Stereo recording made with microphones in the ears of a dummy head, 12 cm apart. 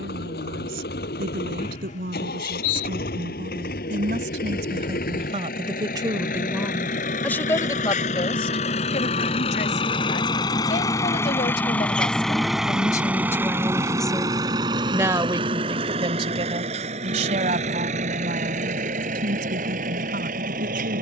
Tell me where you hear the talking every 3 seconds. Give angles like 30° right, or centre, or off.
70° right, 60° right, 10° left, 50° left, 10° left, 40° right, 70° right.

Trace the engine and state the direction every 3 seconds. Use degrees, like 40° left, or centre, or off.
80° left, 70° left, 60° left, 30° left, 20° right, 50° right, 60° right.